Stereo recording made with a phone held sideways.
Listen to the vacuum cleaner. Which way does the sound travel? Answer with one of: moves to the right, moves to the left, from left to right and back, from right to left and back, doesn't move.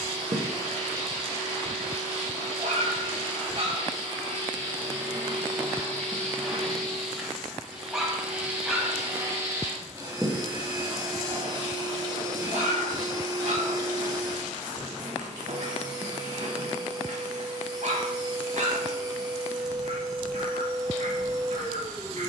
moves to the right.